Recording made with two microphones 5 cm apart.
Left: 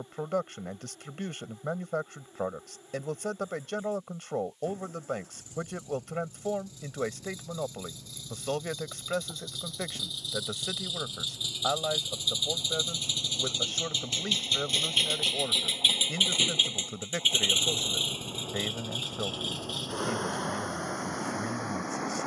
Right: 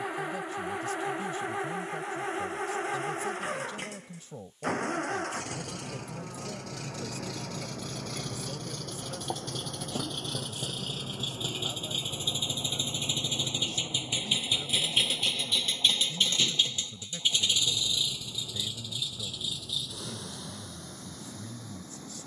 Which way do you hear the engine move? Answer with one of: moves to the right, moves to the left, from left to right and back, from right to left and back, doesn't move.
moves to the left.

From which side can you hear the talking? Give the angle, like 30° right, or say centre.
50° left.